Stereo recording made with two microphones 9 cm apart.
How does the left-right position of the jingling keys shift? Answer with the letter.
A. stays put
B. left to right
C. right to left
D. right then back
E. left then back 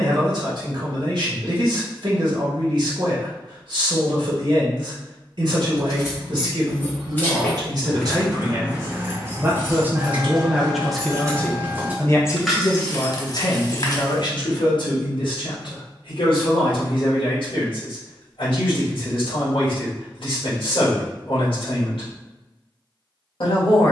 D.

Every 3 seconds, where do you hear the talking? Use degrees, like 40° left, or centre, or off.
60° right, 60° right, 50° right, 10° right, 50° left, 70° left, 70° left, 70° left.